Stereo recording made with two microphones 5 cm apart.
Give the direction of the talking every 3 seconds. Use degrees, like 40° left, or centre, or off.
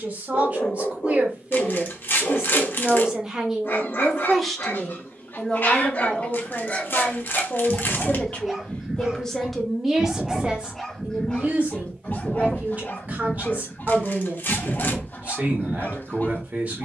30° right, centre, 40° left, 20° right, 40° right, 40° right.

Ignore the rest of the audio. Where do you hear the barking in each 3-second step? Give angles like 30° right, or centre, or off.
50° left, 50° left, 10° left, centre, 50° left, 50° left.